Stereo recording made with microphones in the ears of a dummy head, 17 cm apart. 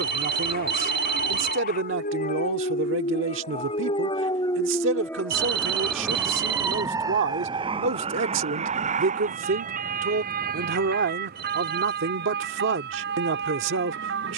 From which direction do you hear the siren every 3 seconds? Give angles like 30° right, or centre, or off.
50° left, 20° left, 20° right, 50° right, 60° right.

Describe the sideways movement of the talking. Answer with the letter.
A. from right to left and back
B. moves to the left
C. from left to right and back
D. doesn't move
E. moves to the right
D.